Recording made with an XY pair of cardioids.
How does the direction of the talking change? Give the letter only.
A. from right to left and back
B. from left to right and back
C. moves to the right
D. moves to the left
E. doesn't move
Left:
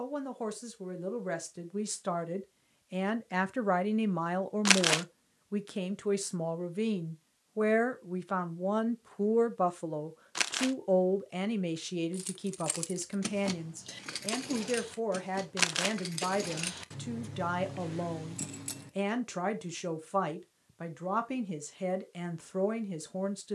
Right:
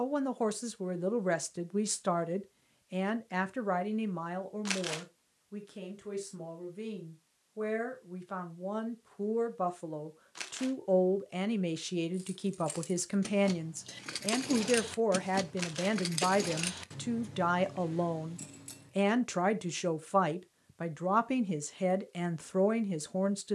A.